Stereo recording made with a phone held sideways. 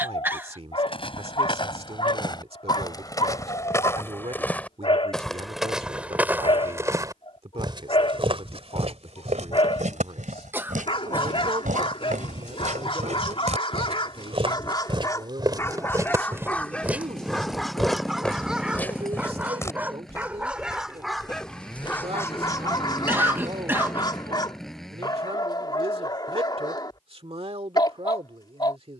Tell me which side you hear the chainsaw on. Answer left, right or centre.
centre.